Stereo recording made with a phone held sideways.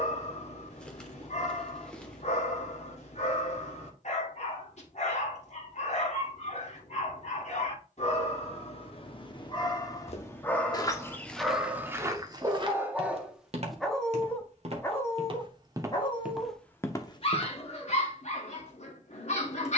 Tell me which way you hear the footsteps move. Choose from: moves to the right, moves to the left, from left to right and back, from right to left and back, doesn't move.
from left to right and back.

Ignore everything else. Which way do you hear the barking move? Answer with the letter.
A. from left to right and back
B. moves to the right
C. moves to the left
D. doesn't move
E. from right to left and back
A.